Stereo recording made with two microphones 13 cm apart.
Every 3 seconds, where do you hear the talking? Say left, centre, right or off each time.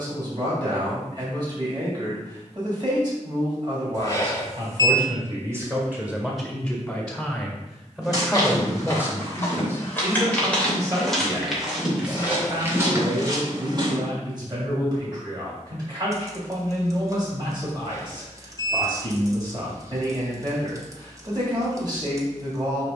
right, right, centre, right, right, right, right, right.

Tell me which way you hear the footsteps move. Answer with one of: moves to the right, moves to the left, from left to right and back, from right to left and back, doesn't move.
moves to the right.